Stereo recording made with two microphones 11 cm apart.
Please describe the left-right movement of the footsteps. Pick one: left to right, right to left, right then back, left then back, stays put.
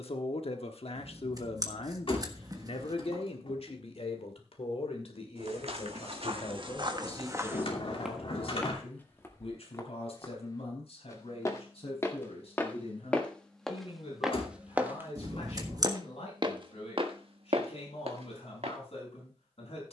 left then back.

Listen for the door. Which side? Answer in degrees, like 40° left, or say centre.
50° left.